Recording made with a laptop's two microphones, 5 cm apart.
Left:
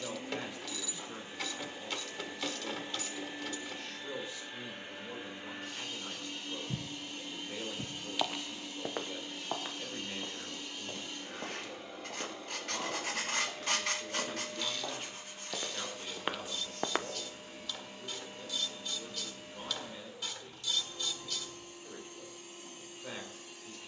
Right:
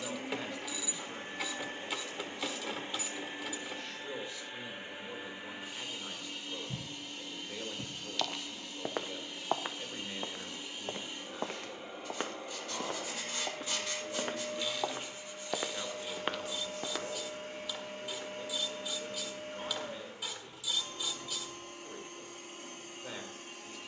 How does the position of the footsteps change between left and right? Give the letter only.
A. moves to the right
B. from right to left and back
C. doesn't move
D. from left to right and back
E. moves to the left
D.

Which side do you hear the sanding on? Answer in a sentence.
In this clip you hear the sanding on the left.